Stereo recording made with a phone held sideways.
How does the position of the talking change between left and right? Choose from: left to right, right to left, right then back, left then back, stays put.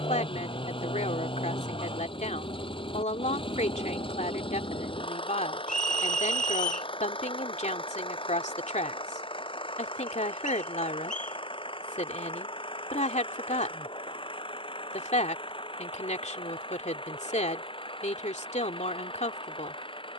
stays put.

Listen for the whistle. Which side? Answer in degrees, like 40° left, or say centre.
60° left.